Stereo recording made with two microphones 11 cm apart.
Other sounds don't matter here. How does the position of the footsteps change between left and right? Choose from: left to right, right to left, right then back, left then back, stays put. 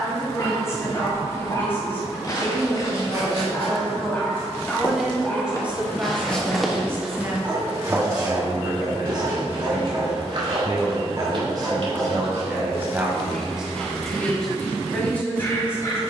left to right.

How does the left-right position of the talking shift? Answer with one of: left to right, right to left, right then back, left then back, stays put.
right then back.